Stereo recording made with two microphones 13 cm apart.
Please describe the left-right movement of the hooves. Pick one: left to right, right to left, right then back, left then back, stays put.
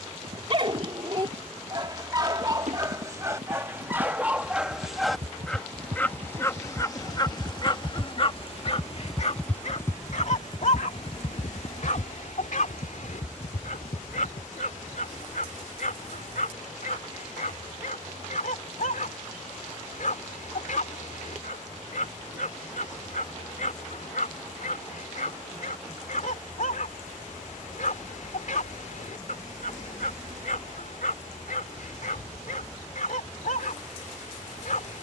right to left.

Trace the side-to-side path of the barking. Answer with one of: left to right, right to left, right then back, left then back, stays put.
right to left.